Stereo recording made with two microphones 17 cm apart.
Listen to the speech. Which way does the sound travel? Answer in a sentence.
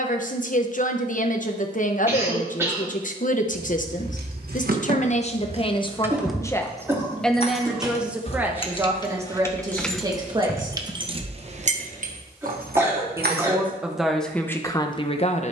You can hear the speech go right and come back.